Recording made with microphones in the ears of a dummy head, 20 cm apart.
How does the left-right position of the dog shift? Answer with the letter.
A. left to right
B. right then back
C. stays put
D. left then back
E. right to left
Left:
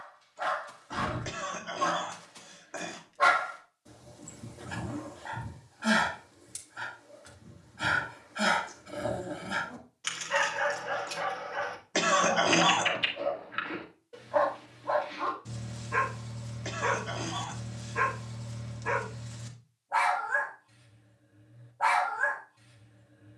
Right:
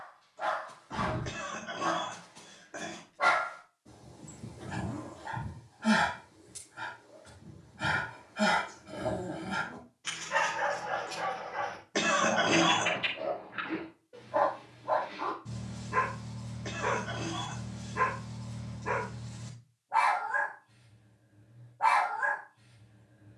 C.